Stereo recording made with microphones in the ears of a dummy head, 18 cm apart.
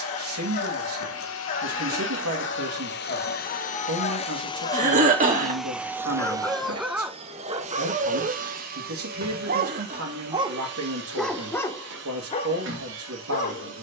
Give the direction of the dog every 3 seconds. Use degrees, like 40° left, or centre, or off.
40° left, 40° left, 20° right, 10° right, 30° left.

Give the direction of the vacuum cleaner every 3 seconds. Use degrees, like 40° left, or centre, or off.
70° left, 20° left, 30° right, 50° right, 60° right.